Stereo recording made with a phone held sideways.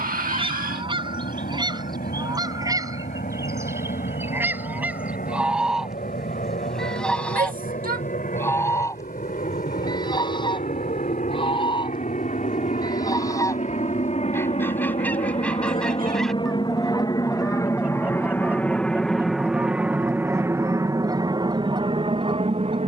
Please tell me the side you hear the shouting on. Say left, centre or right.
right.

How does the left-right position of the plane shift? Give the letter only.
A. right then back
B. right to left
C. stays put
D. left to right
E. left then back
D.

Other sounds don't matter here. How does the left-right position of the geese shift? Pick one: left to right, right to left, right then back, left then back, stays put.
left then back.